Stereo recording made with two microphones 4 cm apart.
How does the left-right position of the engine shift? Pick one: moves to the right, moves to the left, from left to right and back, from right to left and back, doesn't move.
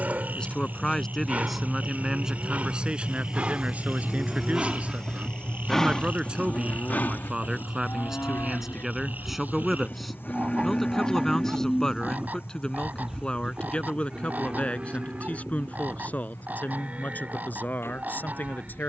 moves to the left.